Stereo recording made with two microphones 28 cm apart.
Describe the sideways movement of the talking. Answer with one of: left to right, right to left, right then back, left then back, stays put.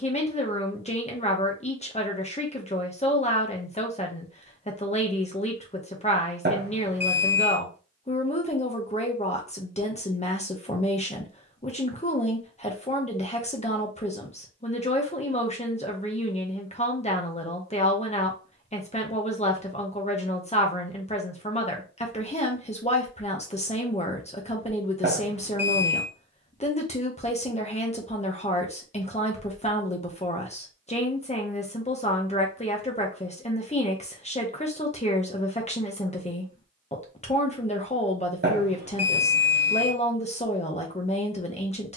stays put.